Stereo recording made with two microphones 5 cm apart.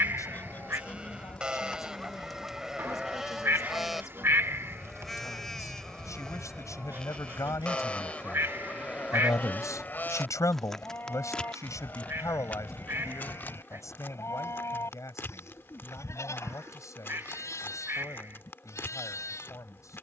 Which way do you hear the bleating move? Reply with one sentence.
You can hear the bleating go from the right side to the left.